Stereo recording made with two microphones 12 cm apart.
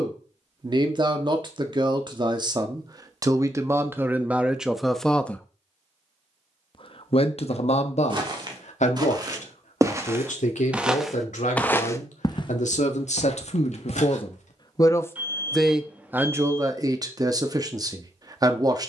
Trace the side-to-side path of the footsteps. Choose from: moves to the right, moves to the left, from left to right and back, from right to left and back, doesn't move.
moves to the left.